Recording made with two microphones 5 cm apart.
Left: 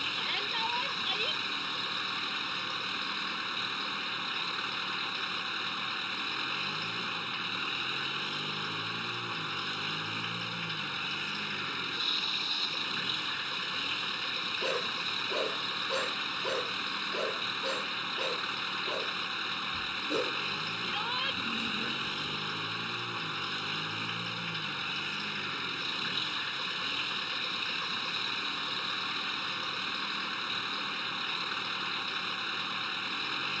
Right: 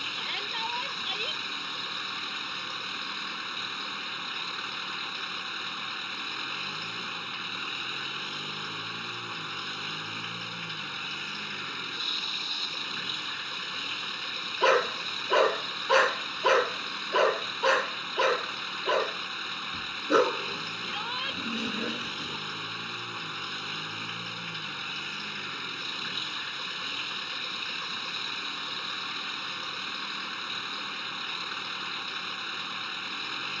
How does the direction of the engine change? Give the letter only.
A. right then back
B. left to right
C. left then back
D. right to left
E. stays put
E.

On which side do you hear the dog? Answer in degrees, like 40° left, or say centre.
70° right.